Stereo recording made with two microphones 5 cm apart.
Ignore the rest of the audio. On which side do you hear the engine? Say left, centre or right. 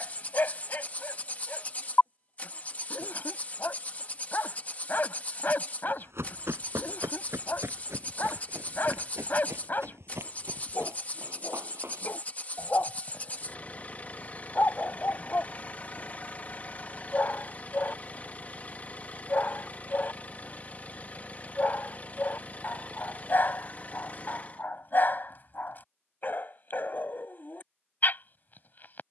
left.